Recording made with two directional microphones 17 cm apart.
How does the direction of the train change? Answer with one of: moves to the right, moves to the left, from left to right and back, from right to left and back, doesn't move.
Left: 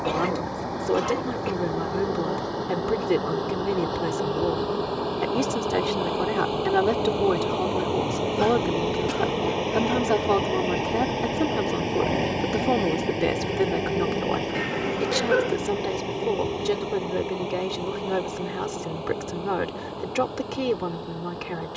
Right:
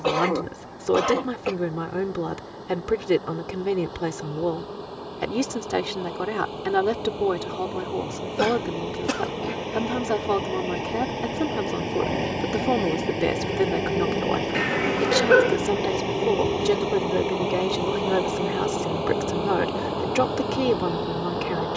moves to the right.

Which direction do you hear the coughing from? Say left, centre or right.
right.